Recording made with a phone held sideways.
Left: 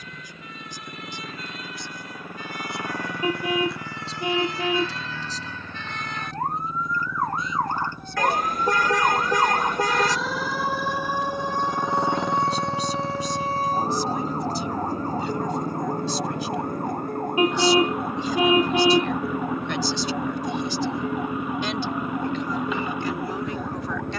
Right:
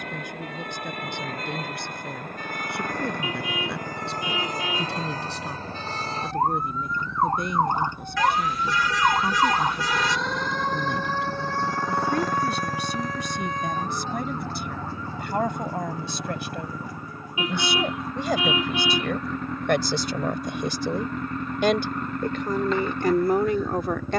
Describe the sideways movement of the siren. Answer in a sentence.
In this clip you hear the siren travel towards the left.